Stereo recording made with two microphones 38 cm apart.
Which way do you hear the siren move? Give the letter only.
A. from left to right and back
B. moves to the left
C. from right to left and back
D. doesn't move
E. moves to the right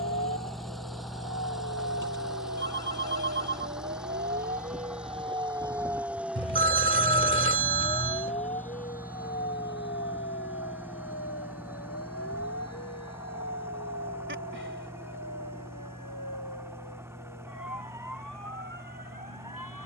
B.